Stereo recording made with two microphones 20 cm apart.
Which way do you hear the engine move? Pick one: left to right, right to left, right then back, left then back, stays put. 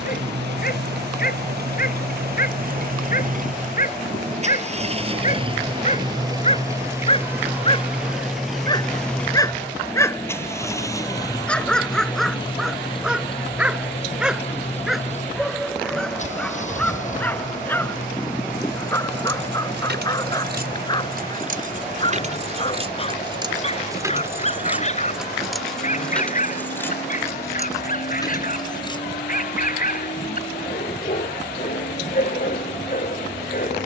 right to left.